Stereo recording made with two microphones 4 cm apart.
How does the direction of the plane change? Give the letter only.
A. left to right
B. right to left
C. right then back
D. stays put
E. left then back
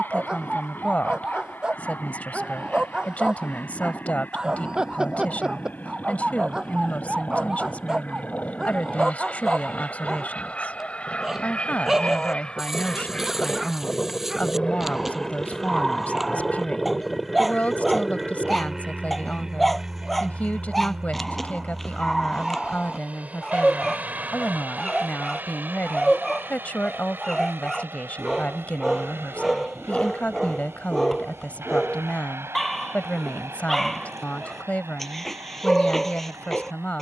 A.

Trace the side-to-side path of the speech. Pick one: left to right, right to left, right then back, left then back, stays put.
stays put.